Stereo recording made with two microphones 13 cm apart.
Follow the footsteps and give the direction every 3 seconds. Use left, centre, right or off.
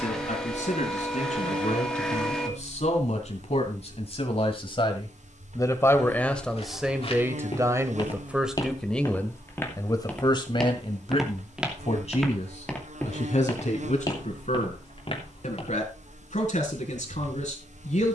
off, off, left, centre, left, left.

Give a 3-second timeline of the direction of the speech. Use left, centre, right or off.
left, left, centre, left, left, left.